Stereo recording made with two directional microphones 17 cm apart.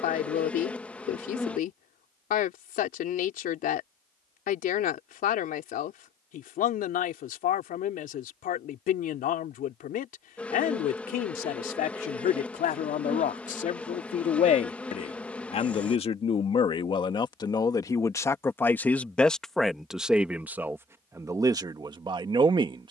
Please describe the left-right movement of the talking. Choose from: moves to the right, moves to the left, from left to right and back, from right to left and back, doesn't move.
moves to the right.